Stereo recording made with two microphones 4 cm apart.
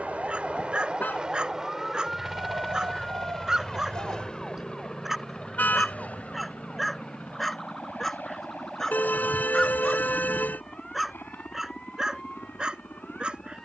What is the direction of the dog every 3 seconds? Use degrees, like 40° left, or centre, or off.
20° right, 10° right, centre, centre, 20° right.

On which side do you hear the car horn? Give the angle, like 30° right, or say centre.
40° left.